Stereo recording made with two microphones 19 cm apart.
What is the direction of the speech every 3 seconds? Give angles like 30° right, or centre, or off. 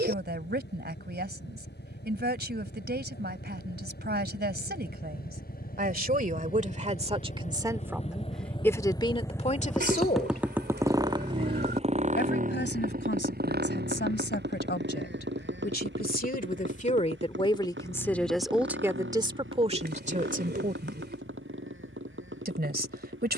60° right, 60° right, 20° right, 40° left, 70° left, 40° left, 20° right, 60° right.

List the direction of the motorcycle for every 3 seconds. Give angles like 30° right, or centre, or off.
70° left, 60° left, 40° left, 10° right, 50° right, 70° right, 80° right, 80° right.